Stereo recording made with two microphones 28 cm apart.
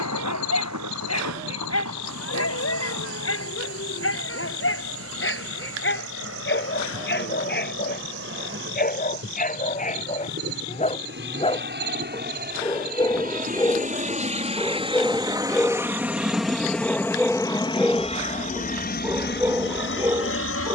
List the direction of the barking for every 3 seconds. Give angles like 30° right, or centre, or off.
60° left, 50° left, 40° left, 30° left, 10° left, centre, 10° right.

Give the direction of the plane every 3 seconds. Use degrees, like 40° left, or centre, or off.
60° right, 60° right, 50° right, 50° right, 30° right, centre, 40° left.